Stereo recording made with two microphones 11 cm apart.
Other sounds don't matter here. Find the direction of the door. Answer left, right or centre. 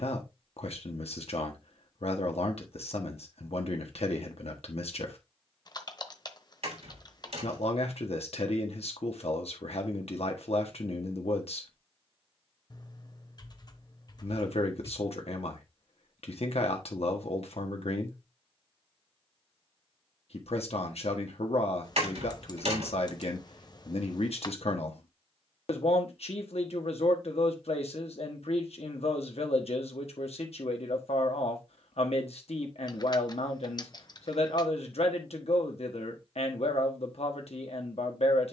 right.